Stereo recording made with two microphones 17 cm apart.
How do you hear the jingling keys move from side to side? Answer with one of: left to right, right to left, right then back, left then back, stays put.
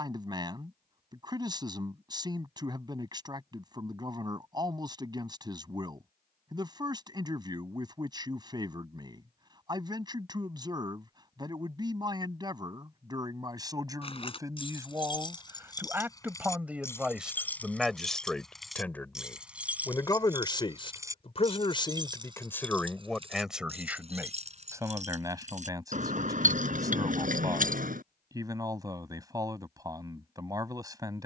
left to right.